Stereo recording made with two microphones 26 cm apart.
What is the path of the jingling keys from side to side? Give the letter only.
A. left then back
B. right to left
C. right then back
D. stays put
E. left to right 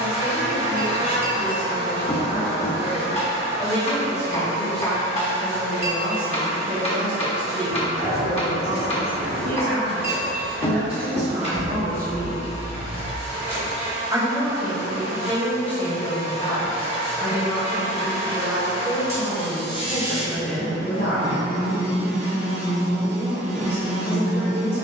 B.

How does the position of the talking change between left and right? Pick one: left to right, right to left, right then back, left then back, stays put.
right then back.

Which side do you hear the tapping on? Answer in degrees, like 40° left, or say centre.
20° left.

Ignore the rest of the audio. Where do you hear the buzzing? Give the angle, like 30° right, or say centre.
40° right.